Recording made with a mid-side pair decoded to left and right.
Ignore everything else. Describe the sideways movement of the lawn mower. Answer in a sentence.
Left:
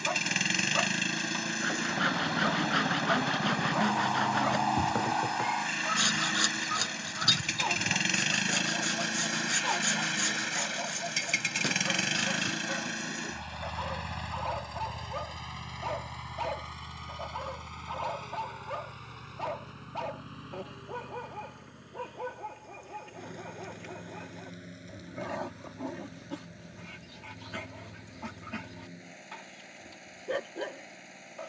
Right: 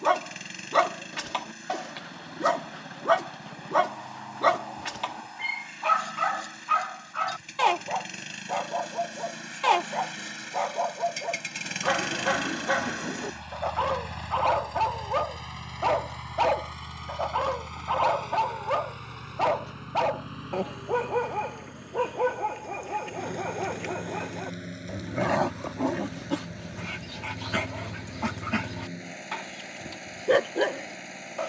You can hear the lawn mower move from left to right.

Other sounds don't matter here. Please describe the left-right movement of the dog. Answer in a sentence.
You can hear the dog stay put.